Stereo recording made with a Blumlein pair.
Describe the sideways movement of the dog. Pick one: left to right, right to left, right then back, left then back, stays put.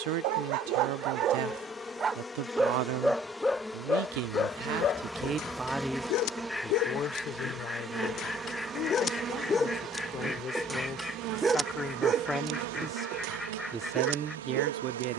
left then back.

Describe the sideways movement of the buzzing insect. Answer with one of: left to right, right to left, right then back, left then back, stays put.
left to right.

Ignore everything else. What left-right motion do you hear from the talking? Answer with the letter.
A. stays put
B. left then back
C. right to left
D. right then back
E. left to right
B.